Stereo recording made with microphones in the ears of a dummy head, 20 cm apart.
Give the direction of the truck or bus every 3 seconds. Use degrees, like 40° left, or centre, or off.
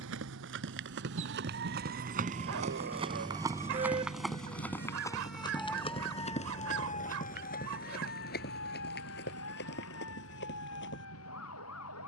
50° right, 30° left, 60° left, 70° left.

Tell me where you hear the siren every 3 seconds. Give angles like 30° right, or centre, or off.
50° right, 20° right, 40° left, 60° left.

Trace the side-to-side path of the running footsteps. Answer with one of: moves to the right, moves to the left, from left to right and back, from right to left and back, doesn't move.
moves to the left.